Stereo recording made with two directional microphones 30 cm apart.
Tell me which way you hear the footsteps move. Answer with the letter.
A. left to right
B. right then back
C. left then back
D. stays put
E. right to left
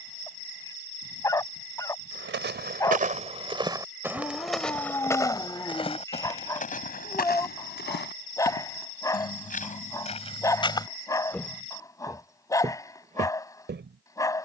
C.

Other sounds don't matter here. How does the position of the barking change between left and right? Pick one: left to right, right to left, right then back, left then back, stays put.
stays put.